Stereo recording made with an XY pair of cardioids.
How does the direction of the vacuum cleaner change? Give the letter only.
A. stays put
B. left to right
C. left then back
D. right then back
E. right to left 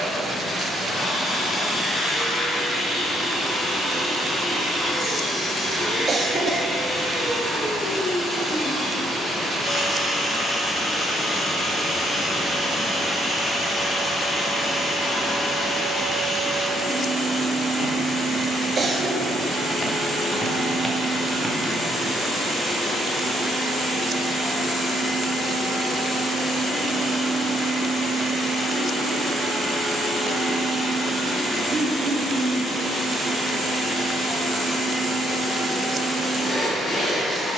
A.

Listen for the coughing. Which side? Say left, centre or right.
right.